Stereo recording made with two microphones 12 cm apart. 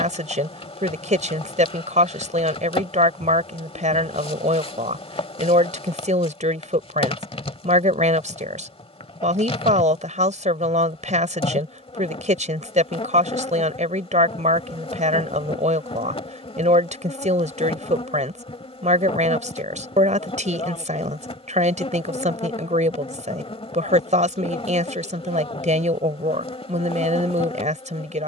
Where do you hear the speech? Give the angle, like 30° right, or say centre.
70° right.